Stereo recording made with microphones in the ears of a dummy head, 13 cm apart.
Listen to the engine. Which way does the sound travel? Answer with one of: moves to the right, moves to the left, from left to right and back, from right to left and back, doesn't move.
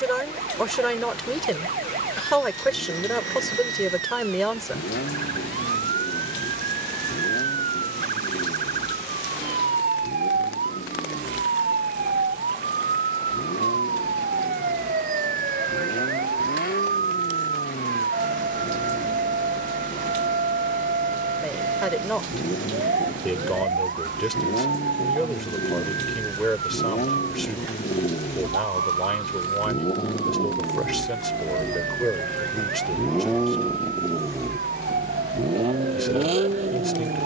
moves to the right.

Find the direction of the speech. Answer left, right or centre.
centre.